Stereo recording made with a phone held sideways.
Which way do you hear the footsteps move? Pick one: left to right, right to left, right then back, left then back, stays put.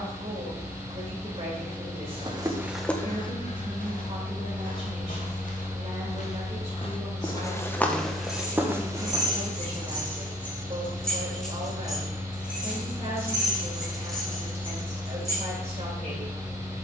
left then back.